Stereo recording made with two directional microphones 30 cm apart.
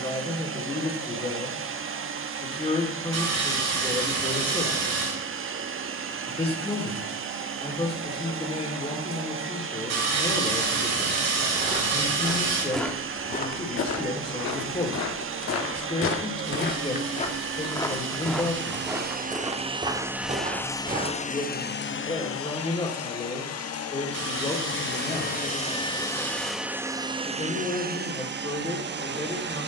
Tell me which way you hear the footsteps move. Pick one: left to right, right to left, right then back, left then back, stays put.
left then back.